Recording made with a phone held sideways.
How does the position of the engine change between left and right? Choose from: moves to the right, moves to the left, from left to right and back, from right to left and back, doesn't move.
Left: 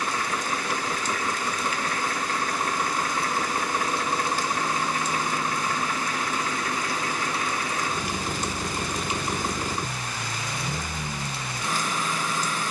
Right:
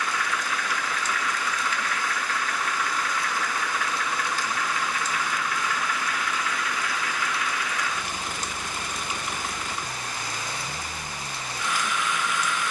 doesn't move.